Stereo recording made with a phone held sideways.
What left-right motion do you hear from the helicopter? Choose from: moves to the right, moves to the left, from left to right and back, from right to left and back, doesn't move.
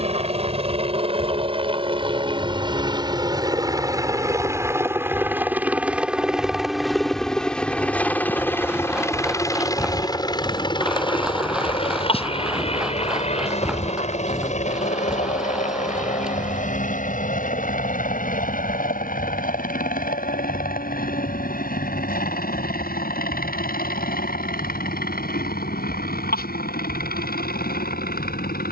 moves to the left.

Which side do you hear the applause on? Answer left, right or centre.
centre.